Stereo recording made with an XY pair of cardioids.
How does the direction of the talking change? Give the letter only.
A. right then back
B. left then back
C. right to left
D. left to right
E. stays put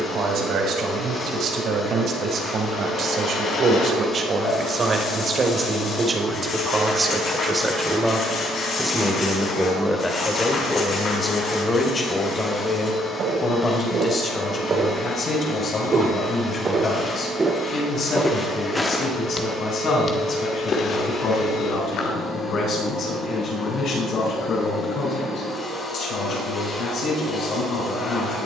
C.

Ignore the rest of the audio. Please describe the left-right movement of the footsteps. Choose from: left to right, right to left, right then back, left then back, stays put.
right to left.